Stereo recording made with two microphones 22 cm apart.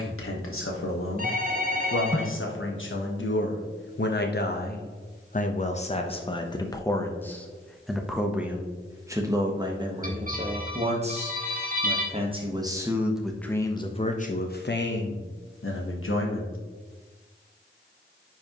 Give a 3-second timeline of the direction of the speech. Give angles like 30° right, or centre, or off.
70° left, 50° left, 10° left, 20° right, 10° left, 70° left.